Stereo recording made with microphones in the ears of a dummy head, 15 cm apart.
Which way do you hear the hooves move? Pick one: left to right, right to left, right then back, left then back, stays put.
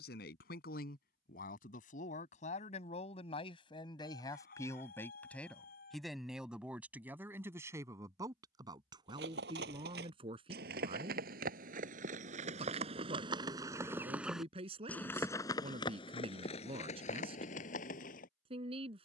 right to left.